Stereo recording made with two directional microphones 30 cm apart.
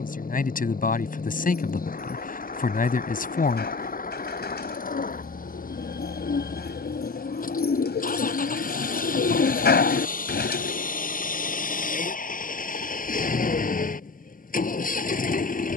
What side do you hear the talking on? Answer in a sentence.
You can hear the talking on the left.